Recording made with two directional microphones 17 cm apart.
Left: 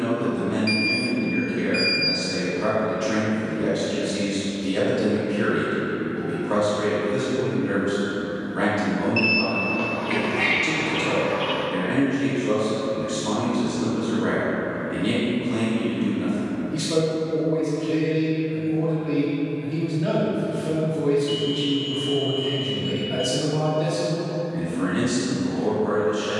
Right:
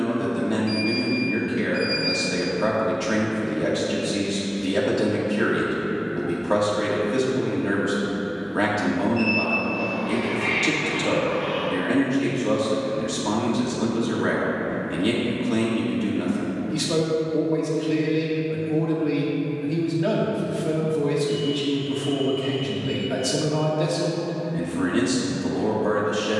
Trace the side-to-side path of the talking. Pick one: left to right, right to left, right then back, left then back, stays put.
stays put.